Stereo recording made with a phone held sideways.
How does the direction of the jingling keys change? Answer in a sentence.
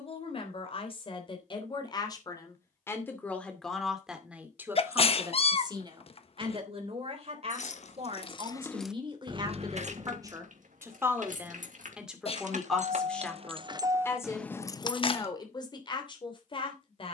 In this clip you hear the jingling keys move from left to right and back again.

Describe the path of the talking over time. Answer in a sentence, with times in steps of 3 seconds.
In this clip you hear the talking on the left from 0 s, in the centre from 3 s, on the right from 6 s, in the centre from 12 s and on the left from 15 s.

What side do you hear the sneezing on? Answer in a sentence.
You can hear the sneezing on the left.